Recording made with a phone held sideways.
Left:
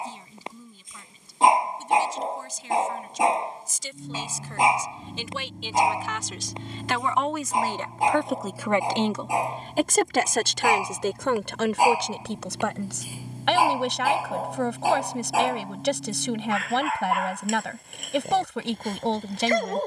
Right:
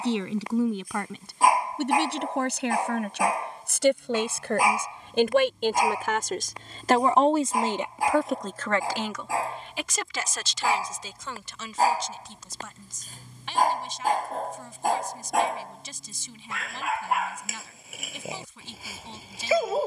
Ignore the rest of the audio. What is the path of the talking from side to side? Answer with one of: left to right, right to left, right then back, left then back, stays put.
right to left.